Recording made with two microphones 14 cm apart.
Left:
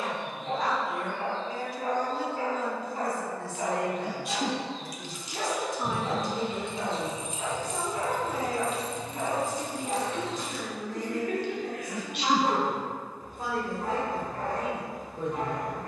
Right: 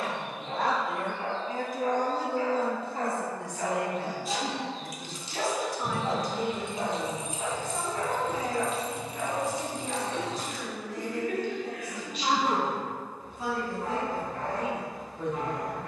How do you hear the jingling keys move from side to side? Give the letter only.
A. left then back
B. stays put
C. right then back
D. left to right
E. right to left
A.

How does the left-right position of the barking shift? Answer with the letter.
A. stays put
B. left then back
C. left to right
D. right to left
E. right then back
E.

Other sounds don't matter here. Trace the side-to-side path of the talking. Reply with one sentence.
You can hear the talking travel towards the left.